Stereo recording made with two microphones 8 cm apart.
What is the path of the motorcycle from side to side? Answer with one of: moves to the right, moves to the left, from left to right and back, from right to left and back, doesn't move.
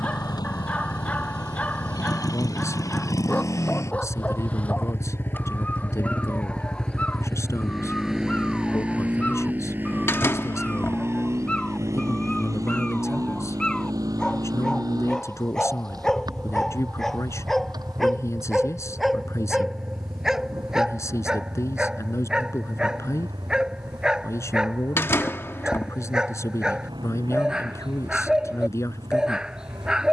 moves to the right.